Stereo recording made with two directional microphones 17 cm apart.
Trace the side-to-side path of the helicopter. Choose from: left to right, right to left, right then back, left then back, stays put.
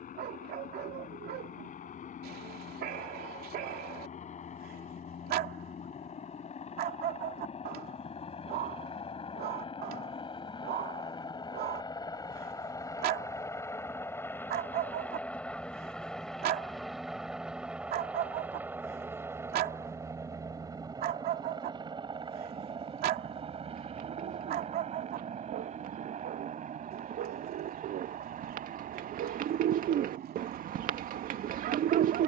left to right.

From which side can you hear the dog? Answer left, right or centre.
right.